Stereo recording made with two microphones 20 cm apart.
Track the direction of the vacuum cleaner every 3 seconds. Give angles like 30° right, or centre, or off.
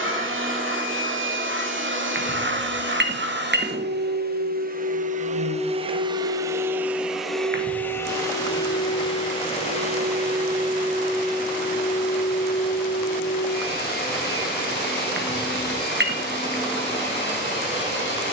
70° right, 50° right, centre, 40° left, 50° left, 60° left.